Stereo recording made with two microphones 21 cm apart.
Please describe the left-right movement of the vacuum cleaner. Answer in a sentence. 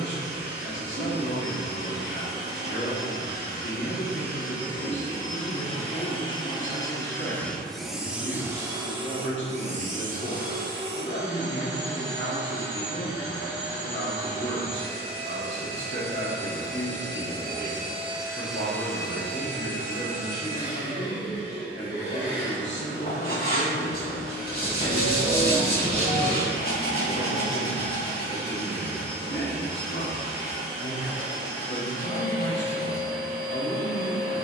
In this clip you hear the vacuum cleaner go right and come back.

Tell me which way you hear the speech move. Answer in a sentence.
You can hear the speech stay put.